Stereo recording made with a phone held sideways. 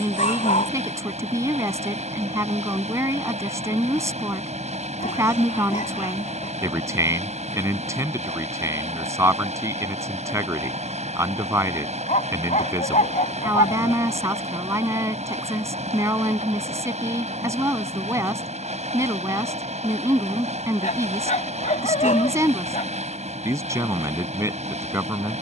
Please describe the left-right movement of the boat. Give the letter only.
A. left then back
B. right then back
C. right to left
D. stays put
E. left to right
D.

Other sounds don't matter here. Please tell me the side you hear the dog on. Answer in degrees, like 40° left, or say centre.
50° left.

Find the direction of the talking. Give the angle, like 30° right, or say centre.
20° right.